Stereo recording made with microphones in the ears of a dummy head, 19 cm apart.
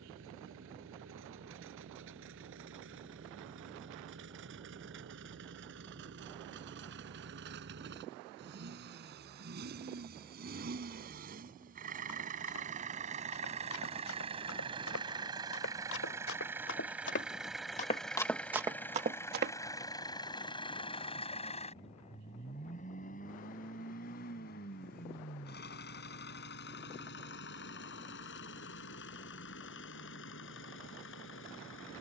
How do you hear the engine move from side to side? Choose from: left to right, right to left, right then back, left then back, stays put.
right to left.